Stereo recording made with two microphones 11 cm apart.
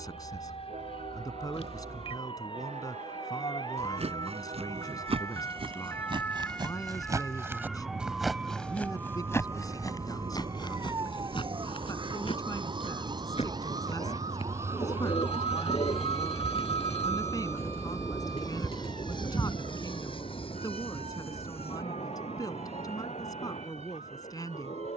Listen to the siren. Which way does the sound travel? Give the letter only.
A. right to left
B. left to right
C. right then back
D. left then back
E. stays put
B.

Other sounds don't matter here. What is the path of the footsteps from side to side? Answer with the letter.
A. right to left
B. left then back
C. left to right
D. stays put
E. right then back
A.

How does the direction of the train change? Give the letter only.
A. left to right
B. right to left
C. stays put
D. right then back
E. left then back
B.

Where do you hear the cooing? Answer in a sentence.
In this clip you hear the cooing on the left.